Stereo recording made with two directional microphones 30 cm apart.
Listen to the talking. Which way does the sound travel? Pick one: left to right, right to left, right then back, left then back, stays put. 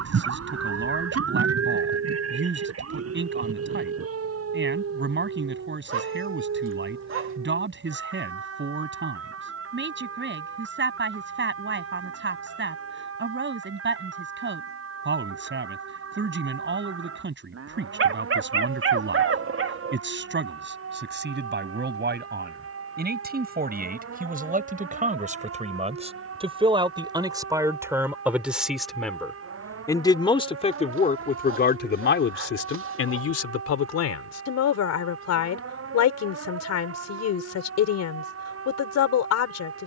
right to left.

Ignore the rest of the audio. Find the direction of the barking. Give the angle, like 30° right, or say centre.
40° right.